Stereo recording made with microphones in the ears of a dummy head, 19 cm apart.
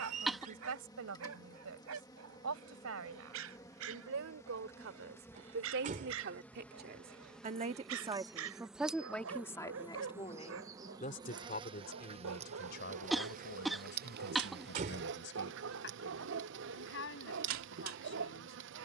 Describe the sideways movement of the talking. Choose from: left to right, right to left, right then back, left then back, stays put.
right to left.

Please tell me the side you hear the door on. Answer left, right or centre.
right.